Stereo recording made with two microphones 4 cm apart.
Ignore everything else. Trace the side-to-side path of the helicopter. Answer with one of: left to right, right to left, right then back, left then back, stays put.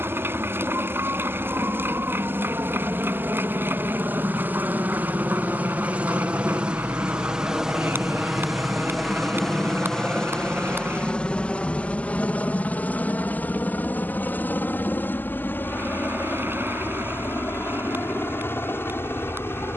right to left.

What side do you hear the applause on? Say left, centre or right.
right.